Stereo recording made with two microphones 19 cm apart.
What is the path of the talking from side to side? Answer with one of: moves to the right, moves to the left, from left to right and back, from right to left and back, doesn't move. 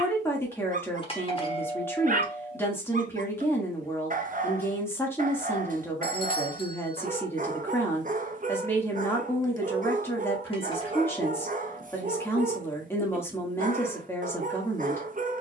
doesn't move.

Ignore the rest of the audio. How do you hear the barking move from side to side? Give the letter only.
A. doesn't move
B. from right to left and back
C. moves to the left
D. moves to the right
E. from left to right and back
A.